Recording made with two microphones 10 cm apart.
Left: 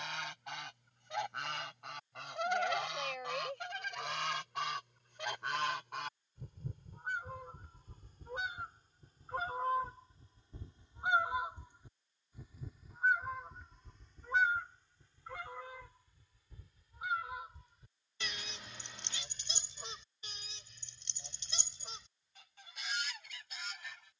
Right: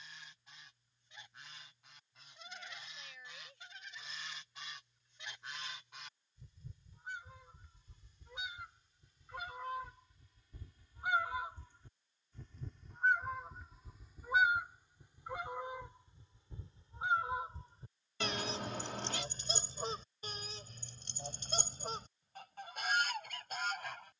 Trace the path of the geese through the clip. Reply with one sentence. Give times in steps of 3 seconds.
In this clip you hear the geese on the left from 0 s, in the centre from 12 s and on the right from 15 s.